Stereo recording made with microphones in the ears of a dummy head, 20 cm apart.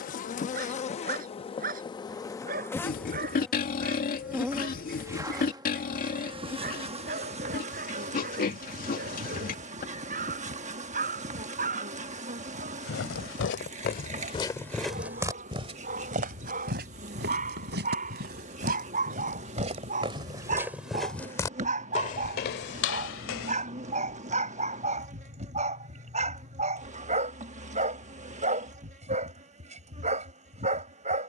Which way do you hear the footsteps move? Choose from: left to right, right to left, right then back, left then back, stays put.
right then back.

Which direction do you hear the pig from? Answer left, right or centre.
left.